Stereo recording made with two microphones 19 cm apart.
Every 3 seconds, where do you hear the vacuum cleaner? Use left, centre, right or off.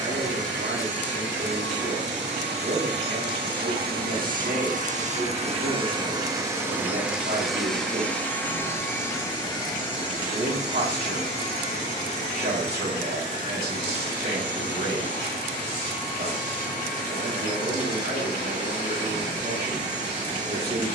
right, right, centre, left, left, left, left.